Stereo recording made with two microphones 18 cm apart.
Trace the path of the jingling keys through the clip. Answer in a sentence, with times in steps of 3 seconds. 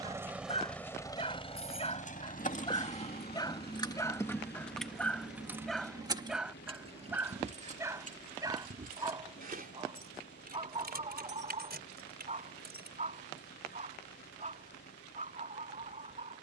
You can hear the jingling keys on the left from 0 s, in the centre from 3 s, on the right from 6 s and not at all from 15 s.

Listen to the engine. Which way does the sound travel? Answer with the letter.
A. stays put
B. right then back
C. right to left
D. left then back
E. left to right
C.